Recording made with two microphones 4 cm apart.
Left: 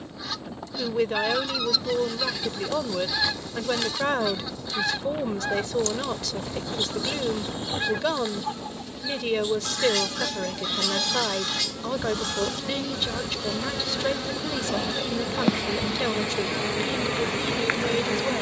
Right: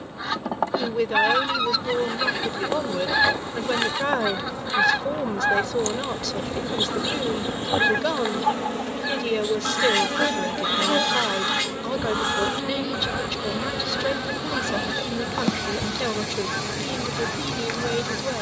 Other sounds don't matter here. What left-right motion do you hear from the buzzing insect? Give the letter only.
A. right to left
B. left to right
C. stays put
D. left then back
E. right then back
A.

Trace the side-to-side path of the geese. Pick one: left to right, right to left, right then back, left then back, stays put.
stays put.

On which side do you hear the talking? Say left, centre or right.
centre.